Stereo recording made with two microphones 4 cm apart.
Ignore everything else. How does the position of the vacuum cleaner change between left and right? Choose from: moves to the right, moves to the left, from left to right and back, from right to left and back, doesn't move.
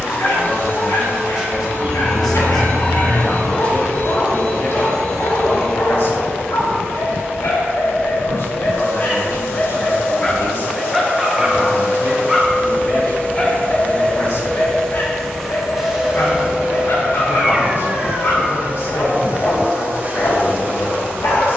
moves to the right.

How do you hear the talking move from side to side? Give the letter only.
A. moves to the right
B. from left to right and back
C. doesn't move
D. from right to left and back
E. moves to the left
E.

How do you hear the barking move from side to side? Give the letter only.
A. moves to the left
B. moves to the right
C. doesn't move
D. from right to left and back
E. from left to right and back
E.